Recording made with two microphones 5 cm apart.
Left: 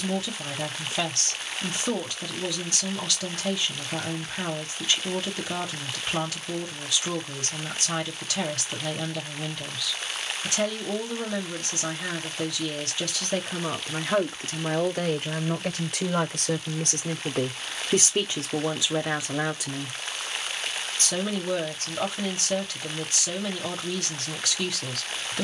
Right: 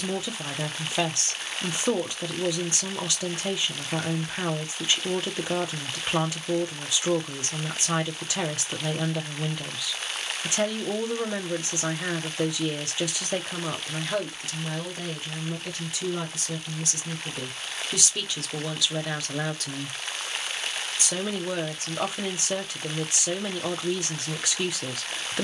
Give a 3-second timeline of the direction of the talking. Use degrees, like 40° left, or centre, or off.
20° right, 20° right, 20° right, 20° right, centre, 50° left, 20° left, 20° right, 20° right.